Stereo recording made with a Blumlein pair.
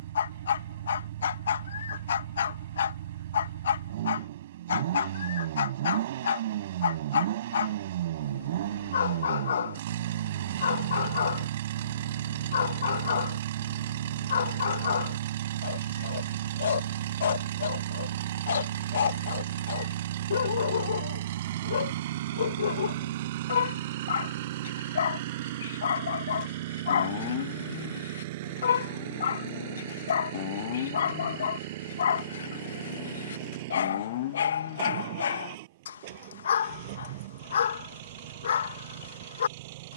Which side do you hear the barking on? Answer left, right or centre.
left.